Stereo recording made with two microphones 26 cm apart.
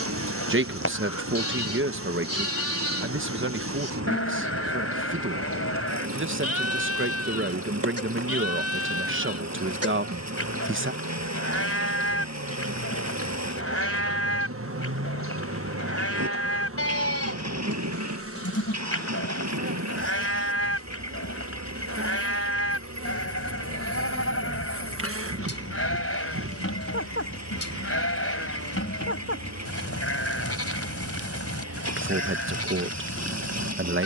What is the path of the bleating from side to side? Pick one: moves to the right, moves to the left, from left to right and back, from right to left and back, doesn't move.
doesn't move.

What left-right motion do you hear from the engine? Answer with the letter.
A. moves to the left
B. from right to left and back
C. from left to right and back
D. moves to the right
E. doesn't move
E.